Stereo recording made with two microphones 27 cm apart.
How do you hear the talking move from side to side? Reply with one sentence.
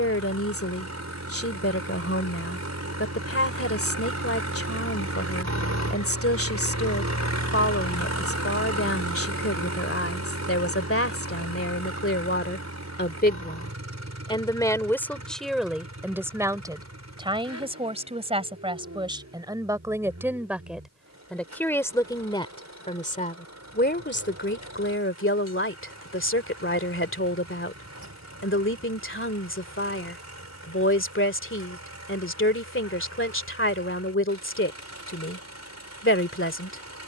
You can hear the talking go right and come back.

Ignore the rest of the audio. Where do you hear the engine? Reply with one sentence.
In this clip you hear the engine on the right.